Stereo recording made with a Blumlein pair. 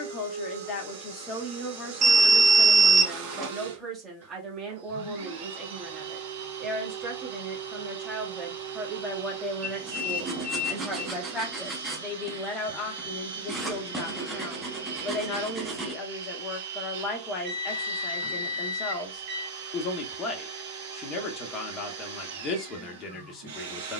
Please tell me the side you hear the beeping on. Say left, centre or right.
right.